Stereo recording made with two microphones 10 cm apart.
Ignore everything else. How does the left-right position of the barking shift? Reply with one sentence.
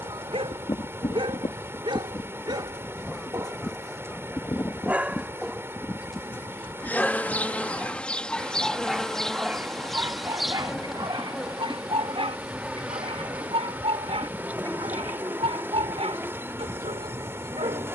In this clip you hear the barking go left and come back.